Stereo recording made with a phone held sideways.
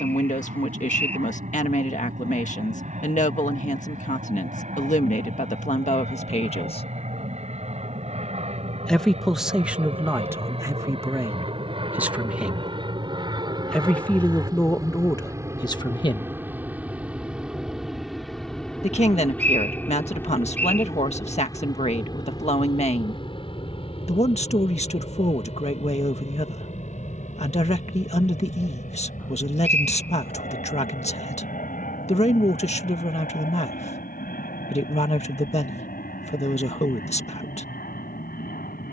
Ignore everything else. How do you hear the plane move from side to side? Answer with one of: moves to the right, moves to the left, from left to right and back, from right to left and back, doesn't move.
moves to the left.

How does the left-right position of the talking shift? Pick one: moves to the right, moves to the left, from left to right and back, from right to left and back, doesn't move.
from left to right and back.